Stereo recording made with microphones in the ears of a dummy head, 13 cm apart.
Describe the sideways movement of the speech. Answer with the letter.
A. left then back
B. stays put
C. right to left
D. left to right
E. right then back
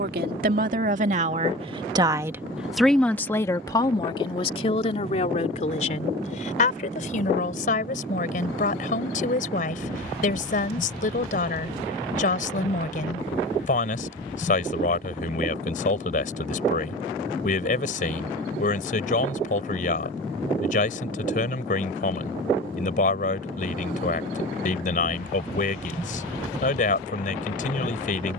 C.